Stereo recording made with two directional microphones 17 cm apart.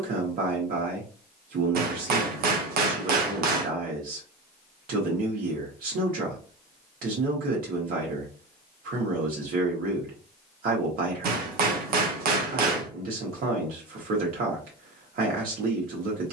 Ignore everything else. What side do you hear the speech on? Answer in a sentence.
You can hear the speech on the right.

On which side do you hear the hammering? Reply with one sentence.
You can hear the hammering on the right.